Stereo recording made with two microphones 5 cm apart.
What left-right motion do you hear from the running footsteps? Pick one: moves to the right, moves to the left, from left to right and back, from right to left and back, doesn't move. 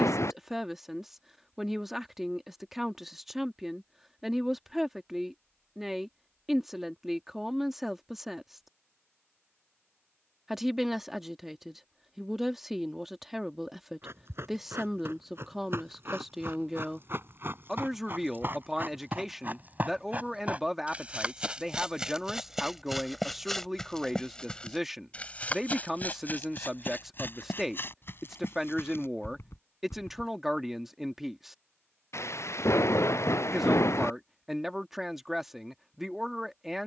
moves to the left.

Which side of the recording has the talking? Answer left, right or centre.
centre.